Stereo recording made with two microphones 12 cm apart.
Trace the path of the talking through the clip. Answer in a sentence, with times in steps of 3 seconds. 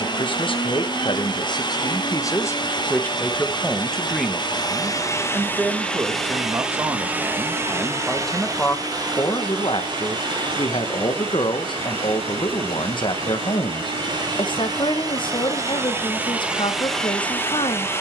You can hear the talking on the left from 0 s, in the centre from 3 s and on the left from 9 s.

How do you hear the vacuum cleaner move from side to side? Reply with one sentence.
You can hear the vacuum cleaner go right and come back.